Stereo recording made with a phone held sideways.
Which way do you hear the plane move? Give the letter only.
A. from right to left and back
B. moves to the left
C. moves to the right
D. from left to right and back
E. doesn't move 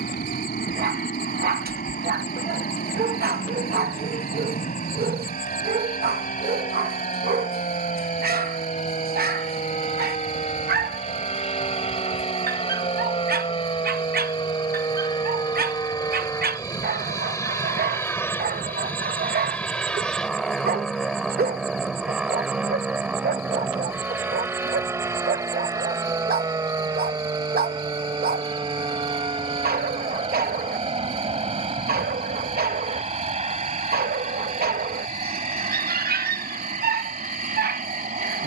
C.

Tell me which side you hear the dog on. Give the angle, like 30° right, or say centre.
70° right.